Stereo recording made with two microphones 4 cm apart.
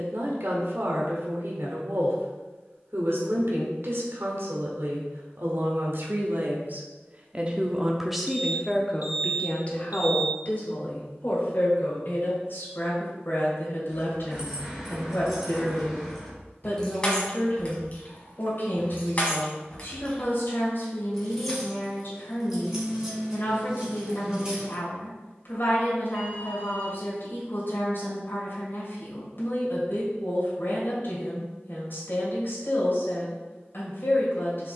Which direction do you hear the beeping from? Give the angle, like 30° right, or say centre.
40° right.